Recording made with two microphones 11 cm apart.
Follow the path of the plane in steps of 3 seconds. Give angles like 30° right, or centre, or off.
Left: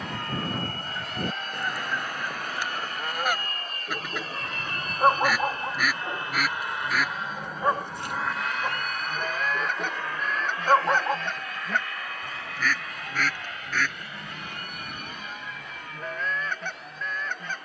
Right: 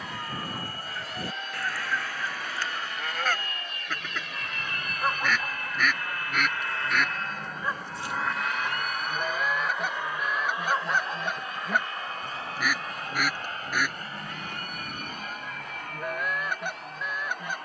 60° left, 40° left, 10° left, 20° right, 30° right, 40° right.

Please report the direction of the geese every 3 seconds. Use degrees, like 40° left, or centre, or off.
20° left, 10° left, centre, 10° right, 10° right, 10° right.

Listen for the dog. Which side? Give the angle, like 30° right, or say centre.
60° left.